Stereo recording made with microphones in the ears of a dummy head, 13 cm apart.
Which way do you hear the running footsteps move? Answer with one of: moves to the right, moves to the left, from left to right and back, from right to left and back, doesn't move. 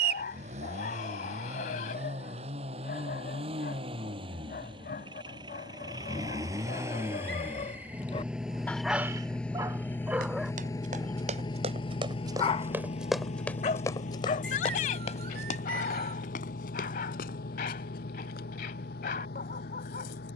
moves to the left.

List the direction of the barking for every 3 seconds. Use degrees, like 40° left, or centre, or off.
70° left, 70° left, 50° left, 10° right, 40° left, 60° left, 60° left.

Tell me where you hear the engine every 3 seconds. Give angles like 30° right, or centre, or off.
50° right, 40° right, 10° right, 20° left, 50° left, 70° left, 80° left.